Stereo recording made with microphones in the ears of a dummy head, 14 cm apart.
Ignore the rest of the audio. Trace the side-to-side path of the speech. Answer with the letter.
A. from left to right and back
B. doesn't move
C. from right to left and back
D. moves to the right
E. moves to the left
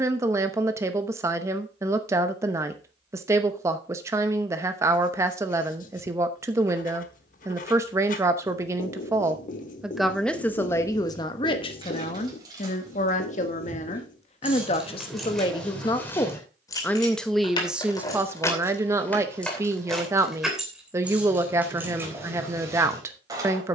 C.